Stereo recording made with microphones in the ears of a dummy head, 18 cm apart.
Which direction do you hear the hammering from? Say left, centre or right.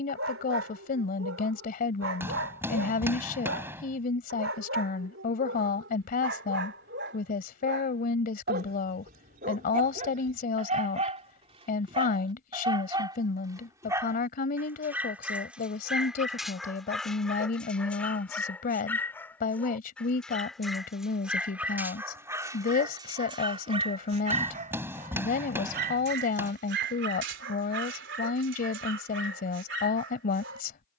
centre.